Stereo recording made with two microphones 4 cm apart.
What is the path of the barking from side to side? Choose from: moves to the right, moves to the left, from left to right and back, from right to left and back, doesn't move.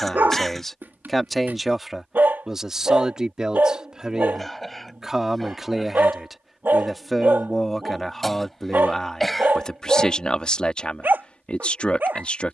doesn't move.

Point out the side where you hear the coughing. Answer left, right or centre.
centre.